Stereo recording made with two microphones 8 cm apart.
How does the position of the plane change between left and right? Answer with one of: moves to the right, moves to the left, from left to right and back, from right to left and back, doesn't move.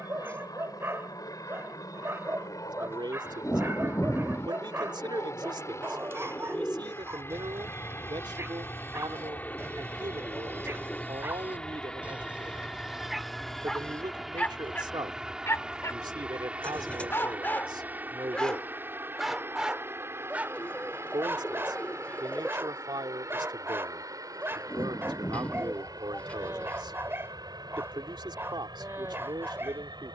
moves to the right.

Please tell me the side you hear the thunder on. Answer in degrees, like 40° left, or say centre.
20° left.